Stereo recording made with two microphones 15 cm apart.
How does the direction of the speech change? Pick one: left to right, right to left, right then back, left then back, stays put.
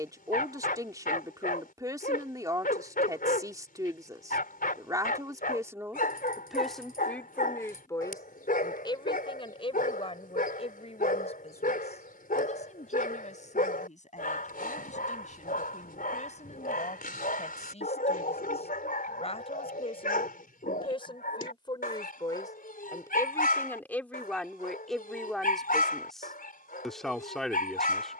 left then back.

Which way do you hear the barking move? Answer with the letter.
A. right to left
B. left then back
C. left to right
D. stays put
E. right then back
D.